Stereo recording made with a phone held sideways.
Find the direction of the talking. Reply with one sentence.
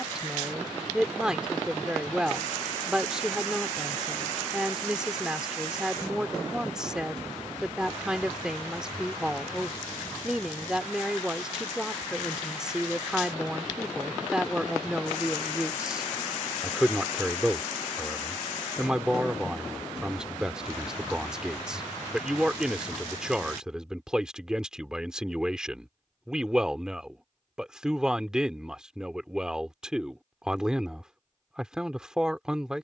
In this clip you hear the talking in the centre.